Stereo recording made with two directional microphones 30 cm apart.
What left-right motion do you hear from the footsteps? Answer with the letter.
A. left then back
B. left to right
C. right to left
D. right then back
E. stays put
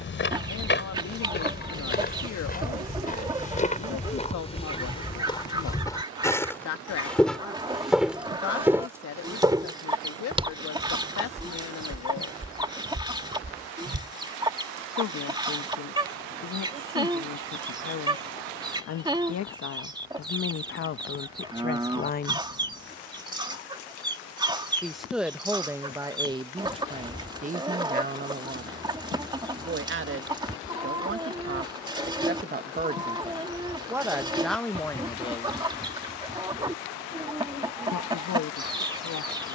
B.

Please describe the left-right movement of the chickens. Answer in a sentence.
You can hear the chickens stay put.